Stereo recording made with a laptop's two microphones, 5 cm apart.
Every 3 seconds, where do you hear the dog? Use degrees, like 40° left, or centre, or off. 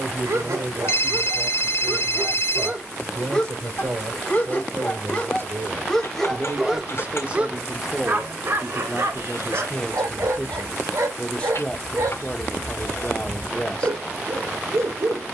50° right, 20° left, 20° right, 70° right, 70° right.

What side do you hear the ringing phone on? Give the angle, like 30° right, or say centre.
60° left.